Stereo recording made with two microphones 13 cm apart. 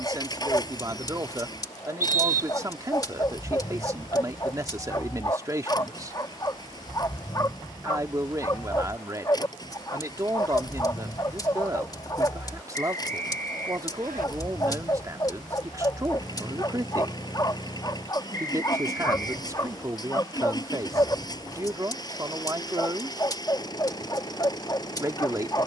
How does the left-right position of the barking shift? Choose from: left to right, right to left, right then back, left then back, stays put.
stays put.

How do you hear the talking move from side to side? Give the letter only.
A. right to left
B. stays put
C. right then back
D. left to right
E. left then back
B.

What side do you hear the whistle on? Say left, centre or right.
right.